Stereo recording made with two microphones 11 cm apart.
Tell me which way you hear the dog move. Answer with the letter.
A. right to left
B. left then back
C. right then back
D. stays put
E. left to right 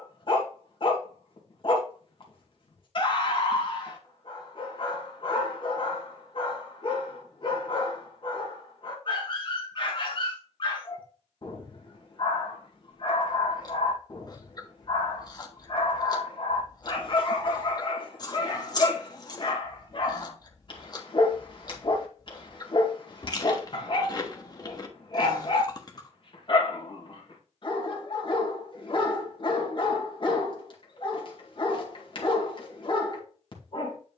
D.